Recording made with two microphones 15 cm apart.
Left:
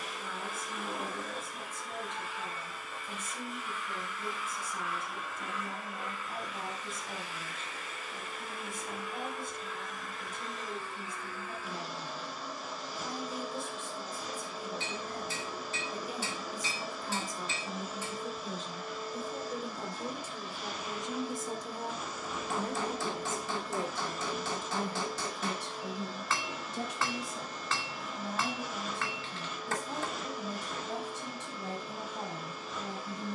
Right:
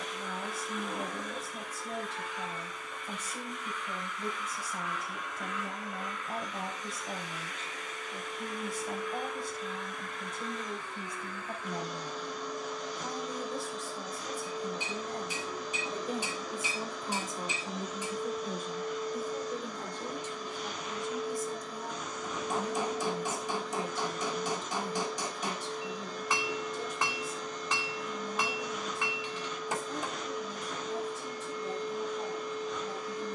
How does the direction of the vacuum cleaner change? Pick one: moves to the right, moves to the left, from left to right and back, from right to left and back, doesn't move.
doesn't move.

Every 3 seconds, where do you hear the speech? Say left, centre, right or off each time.
right, right, right, right, right, right, centre, left, left, left, left.